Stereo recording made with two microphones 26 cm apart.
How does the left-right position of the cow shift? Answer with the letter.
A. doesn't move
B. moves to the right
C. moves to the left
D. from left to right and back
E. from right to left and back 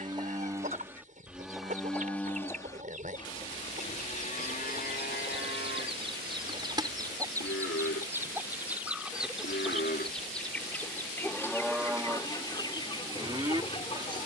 E.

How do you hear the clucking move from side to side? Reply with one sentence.
You can hear the clucking move from right to left.